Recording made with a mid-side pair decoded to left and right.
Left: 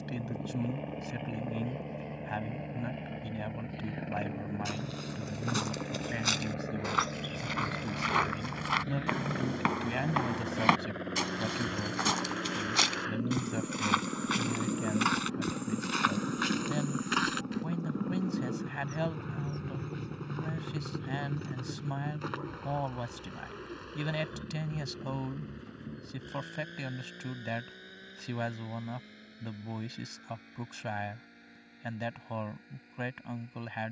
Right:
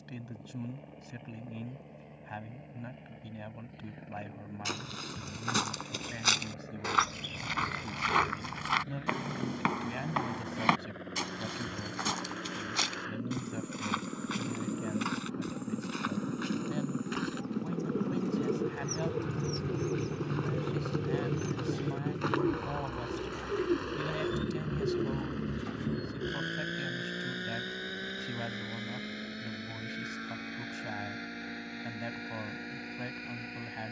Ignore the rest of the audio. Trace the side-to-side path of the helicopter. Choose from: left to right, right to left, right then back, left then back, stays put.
left to right.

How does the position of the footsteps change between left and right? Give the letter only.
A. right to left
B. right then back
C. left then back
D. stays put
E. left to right
A.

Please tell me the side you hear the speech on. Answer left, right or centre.
left.